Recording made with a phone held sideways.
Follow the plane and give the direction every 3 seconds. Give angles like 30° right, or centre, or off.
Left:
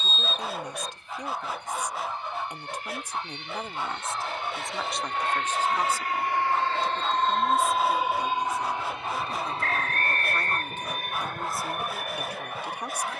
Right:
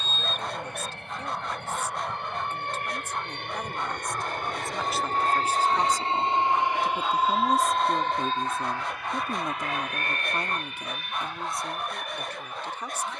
70° right, 50° right, centre, 30° left, 50° left.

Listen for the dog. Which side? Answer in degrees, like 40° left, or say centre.
centre.